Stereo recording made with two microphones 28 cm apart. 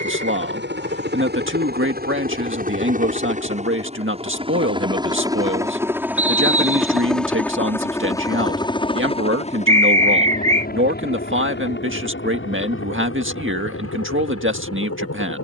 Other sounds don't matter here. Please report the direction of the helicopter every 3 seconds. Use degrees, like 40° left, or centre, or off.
40° right, 20° right, 10° left, 30° left, 50° left.